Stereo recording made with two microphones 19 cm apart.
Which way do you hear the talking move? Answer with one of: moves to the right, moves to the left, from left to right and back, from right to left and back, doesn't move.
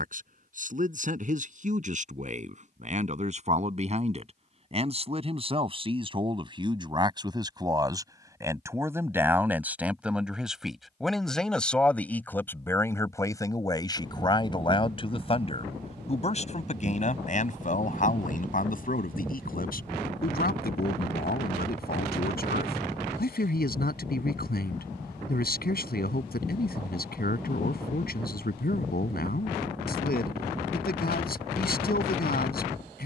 moves to the left.